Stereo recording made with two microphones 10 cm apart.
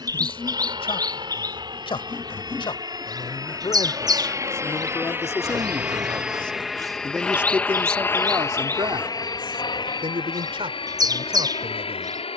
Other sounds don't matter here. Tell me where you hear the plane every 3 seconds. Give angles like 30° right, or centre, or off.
50° right, 30° right, 10° left, 50° left.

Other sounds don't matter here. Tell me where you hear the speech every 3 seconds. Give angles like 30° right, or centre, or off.
60° left, 40° left, 30° right, 60° right.